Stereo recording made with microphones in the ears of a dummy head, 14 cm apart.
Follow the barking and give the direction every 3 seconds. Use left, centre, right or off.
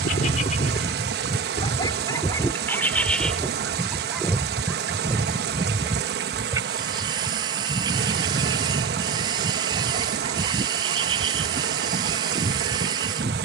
left, centre, right, right, right.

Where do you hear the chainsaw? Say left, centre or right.
right.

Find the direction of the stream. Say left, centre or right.
right.